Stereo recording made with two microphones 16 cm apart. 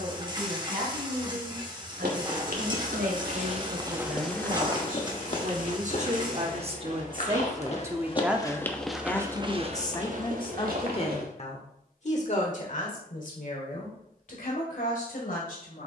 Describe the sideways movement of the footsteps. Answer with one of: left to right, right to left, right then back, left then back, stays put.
left then back.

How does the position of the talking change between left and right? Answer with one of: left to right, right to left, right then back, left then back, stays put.
right to left.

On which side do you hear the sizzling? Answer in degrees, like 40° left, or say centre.
30° right.